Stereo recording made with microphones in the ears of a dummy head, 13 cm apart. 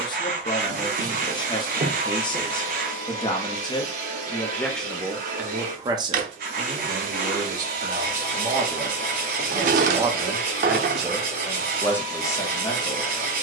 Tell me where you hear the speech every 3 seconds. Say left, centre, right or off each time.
left, centre, right, centre, left.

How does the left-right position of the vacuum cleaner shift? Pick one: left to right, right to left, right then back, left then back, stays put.
stays put.